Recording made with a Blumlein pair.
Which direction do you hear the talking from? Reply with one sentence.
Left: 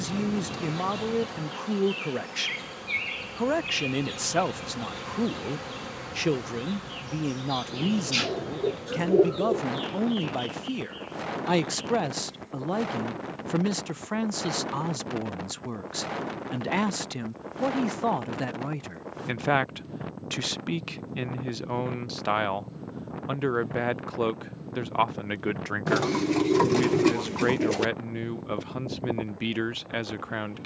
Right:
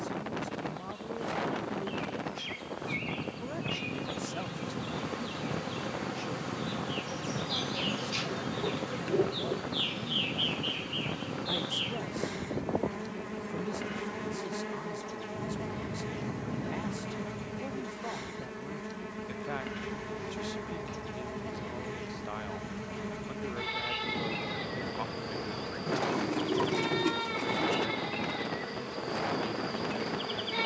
In this clip you hear the talking on the left.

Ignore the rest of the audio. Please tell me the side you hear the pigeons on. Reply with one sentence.
You can hear the pigeons on the left.